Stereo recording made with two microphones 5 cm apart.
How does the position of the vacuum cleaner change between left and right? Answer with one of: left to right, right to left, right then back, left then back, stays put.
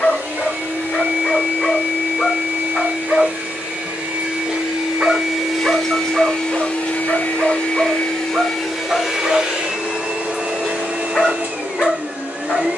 left then back.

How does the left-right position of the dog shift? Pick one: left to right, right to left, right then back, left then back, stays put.
right then back.